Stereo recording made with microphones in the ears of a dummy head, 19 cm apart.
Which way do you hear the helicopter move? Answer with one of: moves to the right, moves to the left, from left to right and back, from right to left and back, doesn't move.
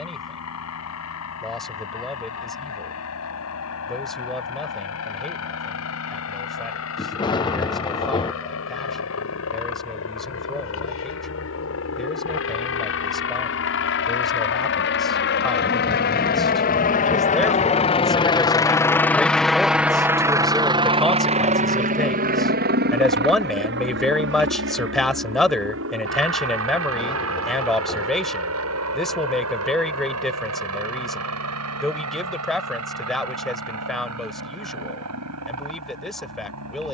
moves to the right.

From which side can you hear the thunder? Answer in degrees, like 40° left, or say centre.
20° left.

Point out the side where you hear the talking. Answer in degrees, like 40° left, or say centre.
centre.